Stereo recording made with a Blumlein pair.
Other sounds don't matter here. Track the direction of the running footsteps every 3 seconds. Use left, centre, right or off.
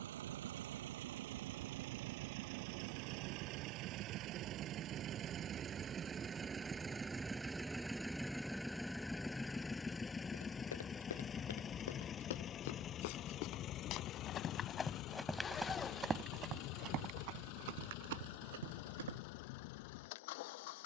off, off, off, left, left, right, right.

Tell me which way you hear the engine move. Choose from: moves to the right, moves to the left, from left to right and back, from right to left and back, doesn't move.
moves to the left.